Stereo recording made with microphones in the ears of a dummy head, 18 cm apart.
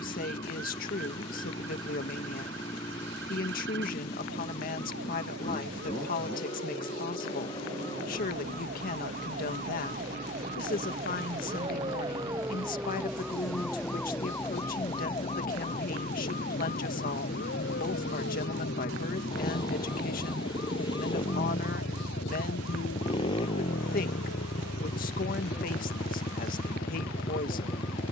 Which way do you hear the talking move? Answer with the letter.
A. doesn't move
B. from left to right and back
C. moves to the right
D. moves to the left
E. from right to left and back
A.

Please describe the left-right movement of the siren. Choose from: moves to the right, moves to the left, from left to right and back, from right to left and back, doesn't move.
moves to the left.